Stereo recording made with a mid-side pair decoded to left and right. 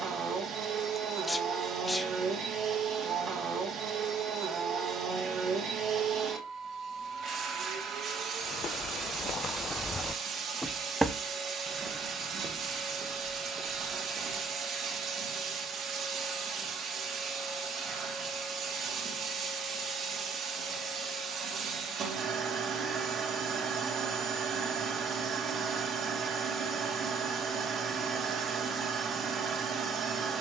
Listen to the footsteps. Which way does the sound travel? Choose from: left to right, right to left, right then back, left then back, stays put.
left to right.